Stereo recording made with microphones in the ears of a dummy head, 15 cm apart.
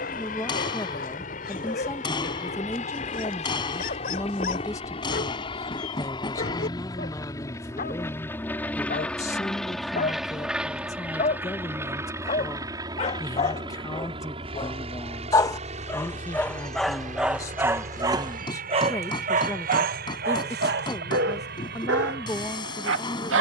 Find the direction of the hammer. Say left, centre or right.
left.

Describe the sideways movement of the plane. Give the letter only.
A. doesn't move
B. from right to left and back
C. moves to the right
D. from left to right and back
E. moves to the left
C.